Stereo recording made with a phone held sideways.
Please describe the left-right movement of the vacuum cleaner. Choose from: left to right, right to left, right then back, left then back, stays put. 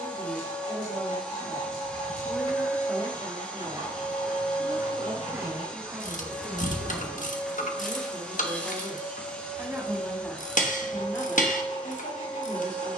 stays put.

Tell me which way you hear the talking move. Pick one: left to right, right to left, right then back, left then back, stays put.
right then back.